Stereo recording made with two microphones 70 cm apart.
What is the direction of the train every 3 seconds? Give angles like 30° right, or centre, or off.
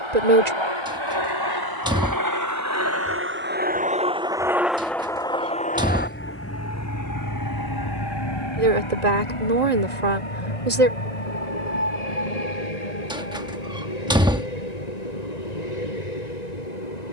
30° right, centre, 30° left, 50° left, 60° left, 70° left.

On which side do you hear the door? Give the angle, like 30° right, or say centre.
10° right.